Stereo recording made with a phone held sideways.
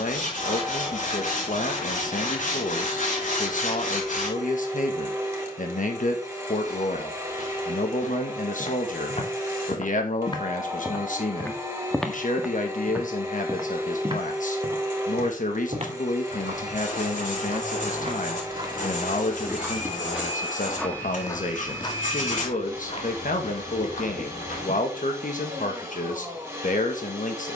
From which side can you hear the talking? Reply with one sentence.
You can hear the talking on the left.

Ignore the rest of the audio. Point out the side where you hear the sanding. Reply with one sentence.
You can hear the sanding on the left.